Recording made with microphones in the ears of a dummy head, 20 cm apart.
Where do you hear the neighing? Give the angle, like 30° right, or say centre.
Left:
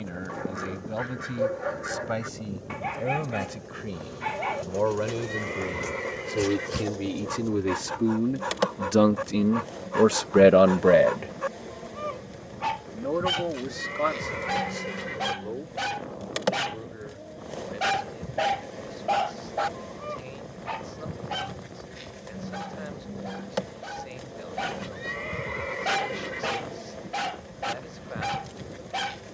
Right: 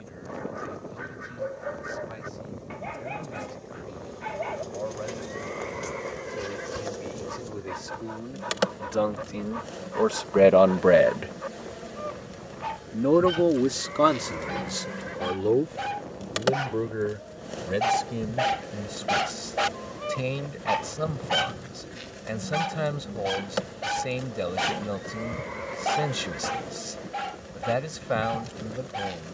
40° left.